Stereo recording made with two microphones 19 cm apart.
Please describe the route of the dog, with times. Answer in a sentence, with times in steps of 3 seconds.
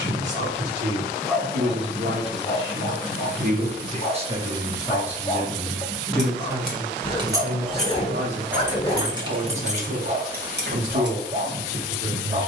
You can hear the dog in the centre from 0 s, on the left from 3 s, in the centre from 6 s and on the right from 9 s.